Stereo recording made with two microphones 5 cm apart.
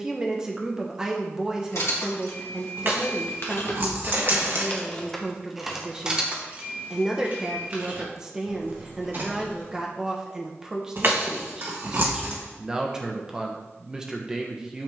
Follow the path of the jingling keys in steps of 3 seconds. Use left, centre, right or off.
left, left, right, right, off.